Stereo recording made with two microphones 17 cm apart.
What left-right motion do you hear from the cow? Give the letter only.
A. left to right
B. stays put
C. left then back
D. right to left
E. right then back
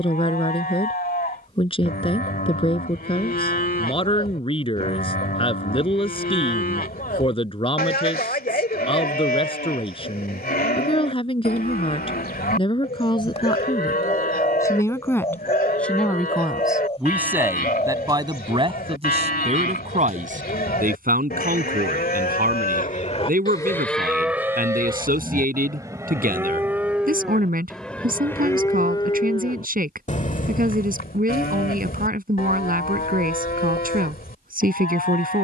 E.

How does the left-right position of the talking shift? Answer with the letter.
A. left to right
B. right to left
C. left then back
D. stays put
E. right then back
A.